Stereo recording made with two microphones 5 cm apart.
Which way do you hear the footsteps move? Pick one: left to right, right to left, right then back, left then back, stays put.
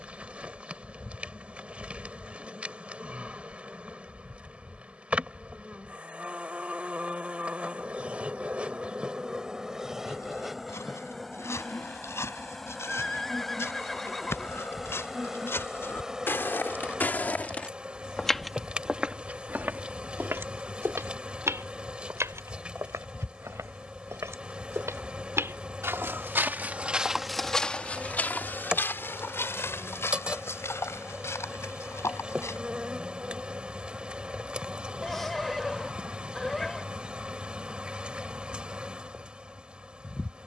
right then back.